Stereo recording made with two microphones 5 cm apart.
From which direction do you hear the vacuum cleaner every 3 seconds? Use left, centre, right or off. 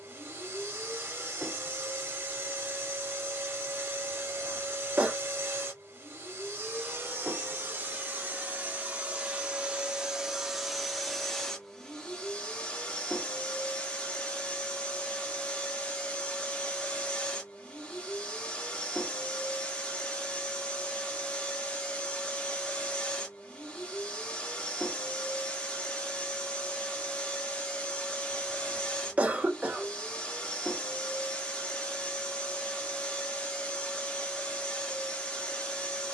right, right, right, centre, left, left, left, left, left, left, left, left.